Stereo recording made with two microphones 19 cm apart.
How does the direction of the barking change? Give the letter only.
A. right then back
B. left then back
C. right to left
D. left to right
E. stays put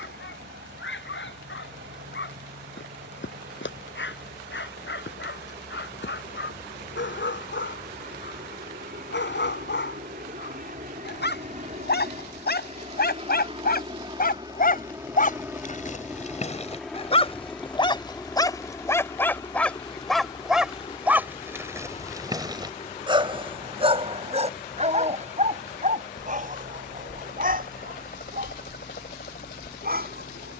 D.